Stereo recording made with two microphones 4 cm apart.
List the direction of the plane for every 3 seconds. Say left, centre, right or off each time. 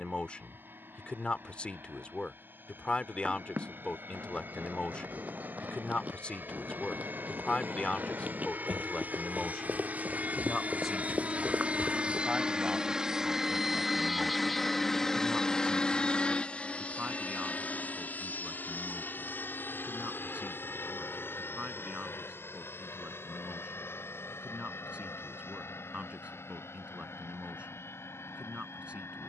right, right, right, right, centre, left, left, left, left, left.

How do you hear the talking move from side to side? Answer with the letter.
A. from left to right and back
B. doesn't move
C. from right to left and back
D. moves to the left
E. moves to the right
E.